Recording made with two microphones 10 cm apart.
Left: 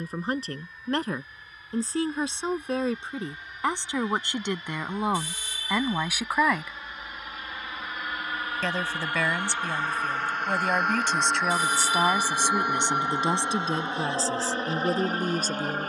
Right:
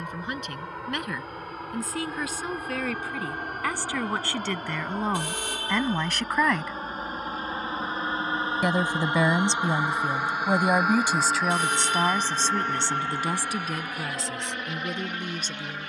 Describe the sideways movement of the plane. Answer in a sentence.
You can hear the plane go from the right side to the left.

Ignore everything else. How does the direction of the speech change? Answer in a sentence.
In this clip you hear the speech move from left to right and back again.